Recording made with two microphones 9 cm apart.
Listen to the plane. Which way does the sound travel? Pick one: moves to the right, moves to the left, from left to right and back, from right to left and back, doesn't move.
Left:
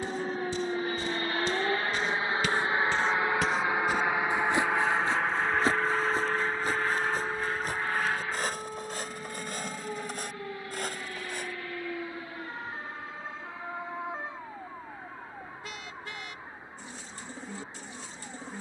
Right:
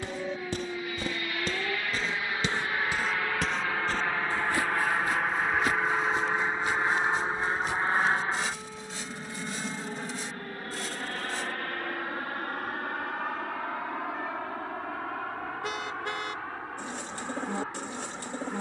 moves to the right.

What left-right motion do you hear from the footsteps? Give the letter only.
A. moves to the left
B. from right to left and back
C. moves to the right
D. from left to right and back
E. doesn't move
A.